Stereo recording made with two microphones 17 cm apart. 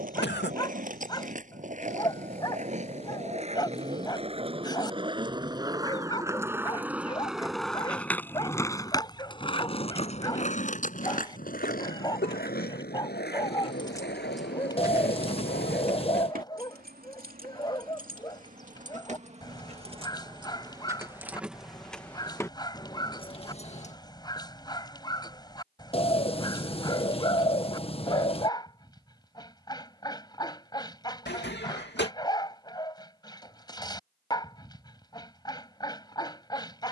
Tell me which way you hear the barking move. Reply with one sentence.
In this clip you hear the barking stay in one place.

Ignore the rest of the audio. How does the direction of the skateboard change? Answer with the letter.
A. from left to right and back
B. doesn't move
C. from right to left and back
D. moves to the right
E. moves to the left
E.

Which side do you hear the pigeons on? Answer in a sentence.
You can hear the pigeons on the left.